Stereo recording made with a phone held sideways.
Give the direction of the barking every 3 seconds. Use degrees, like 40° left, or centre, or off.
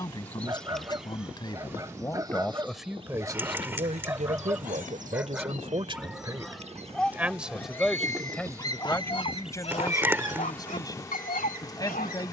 20° right, 10° right, 10° left, 60° left.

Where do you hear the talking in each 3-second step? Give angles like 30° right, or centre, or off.
20° left, 50° right, centre, 20° left.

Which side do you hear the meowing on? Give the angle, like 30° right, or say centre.
10° right.